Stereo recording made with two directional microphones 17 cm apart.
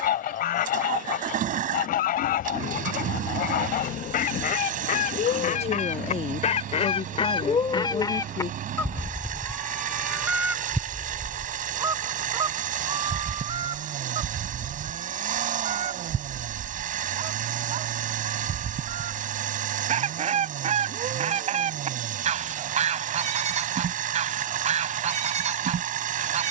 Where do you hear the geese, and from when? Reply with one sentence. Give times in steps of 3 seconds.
In this clip you hear the geese on the left from 0 s, in the centre from 9 s and on the right from 12 s.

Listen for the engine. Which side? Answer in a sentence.
You can hear the engine on the right.